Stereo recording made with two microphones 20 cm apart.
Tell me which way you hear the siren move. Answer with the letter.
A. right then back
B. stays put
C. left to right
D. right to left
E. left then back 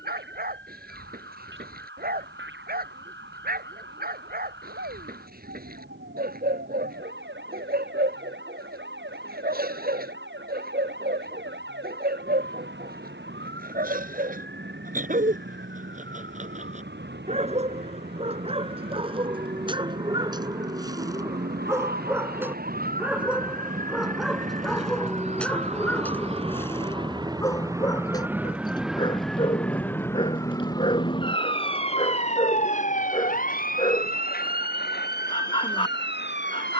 D.